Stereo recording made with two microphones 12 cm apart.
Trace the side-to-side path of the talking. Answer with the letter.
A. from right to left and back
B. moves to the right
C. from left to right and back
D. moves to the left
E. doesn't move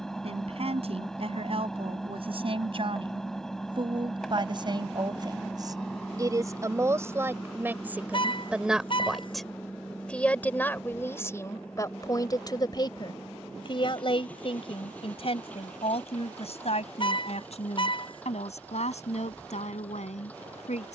D.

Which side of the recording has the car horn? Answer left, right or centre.
left.